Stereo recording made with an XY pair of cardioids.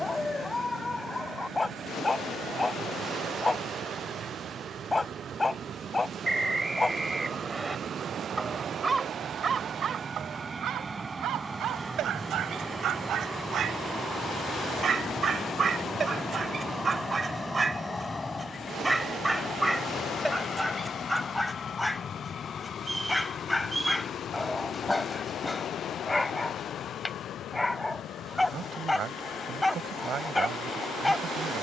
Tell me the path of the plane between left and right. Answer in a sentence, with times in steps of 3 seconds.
In this clip you hear the plane on the right from 0 s, in the centre from 12 s and on the left from 18 s.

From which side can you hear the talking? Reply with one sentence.
In this clip you hear the talking on the right.